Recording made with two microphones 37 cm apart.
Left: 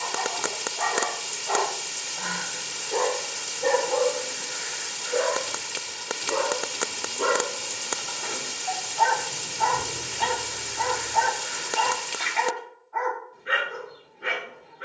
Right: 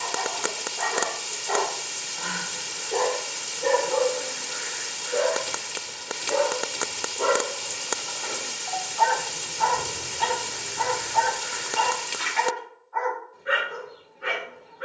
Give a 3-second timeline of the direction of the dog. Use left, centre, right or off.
right, centre, left, left, left.